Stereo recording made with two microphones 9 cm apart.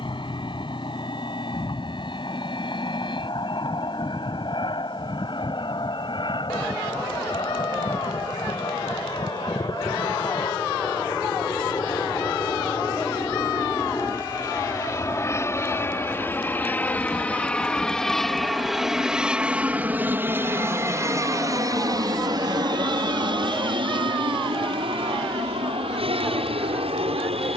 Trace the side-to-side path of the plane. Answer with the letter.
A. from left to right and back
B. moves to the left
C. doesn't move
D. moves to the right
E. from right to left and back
D.